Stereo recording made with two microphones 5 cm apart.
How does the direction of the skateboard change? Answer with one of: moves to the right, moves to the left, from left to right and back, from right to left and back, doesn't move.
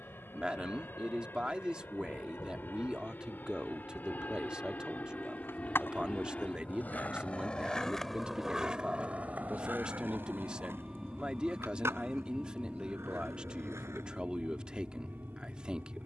moves to the right.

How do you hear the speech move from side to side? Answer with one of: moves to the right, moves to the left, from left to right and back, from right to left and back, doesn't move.
doesn't move.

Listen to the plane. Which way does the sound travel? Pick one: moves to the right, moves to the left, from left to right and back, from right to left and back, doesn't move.
moves to the right.